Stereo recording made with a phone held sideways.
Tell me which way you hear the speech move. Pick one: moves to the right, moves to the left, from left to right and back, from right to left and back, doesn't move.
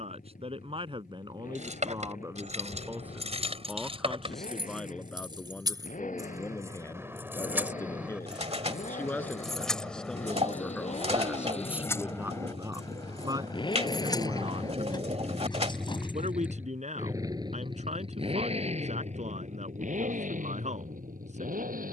from right to left and back.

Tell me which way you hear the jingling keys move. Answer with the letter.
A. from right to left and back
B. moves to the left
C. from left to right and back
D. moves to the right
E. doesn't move
B.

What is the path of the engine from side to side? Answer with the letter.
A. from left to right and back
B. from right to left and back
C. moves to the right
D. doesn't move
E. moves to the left
C.